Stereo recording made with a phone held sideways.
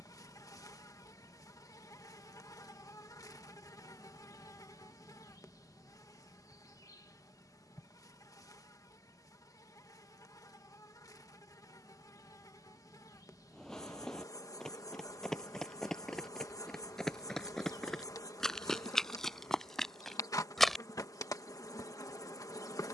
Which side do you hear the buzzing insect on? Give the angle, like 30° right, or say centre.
20° left.